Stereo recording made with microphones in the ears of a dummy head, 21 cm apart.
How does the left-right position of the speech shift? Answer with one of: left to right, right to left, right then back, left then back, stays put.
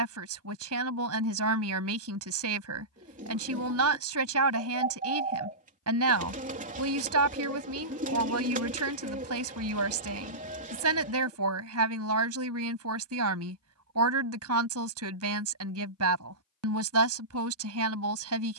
stays put.